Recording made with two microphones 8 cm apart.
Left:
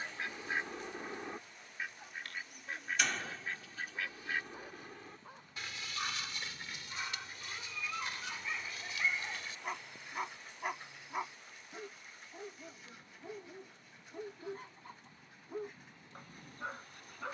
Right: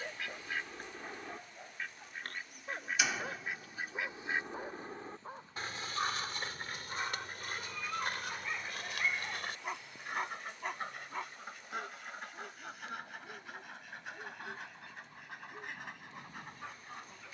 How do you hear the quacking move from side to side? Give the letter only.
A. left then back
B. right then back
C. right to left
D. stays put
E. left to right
E.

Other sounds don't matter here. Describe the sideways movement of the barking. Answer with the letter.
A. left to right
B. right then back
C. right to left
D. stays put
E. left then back
C.